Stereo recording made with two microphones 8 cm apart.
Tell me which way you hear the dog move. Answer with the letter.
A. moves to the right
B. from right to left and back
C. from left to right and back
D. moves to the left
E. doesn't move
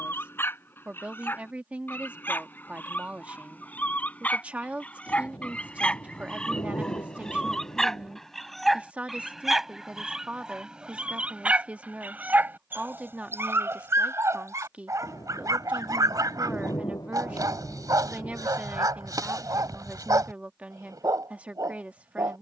A.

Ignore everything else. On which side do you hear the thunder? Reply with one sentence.
In this clip you hear the thunder on the left.